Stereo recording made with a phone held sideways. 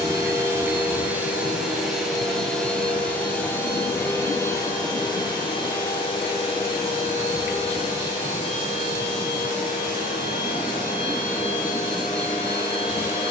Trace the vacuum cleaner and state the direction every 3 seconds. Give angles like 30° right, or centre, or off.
10° right, 20° left, 40° left, 50° left, 60° left.